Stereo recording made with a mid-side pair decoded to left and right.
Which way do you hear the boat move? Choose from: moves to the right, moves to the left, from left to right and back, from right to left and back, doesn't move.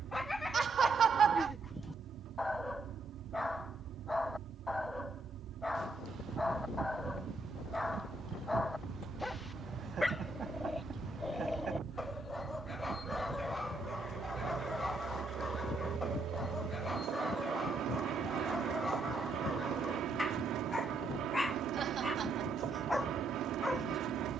doesn't move.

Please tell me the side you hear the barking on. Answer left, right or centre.
centre.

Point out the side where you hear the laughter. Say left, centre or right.
right.